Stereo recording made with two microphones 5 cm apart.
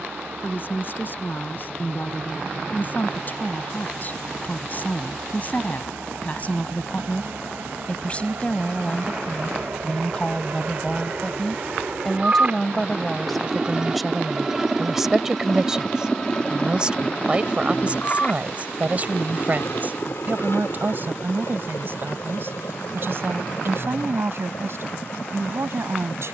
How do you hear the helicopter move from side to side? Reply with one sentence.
You can hear the helicopter move to the left.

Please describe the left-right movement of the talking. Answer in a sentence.
In this clip you hear the talking go from the left side to the right.